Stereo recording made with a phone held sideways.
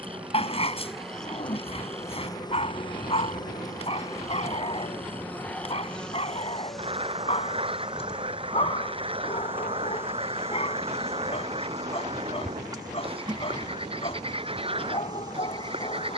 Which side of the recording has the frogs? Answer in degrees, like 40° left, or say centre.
30° right.